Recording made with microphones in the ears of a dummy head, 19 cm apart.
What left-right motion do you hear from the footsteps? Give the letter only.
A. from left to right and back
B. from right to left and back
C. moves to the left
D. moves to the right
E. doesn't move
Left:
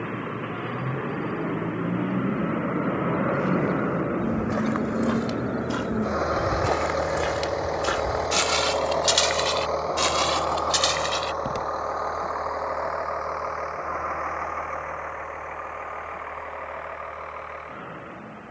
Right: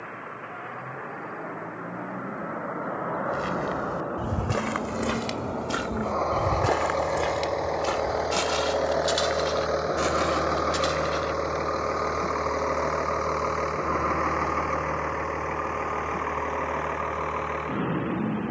C.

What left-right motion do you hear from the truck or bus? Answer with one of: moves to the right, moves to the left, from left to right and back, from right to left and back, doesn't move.
moves to the right.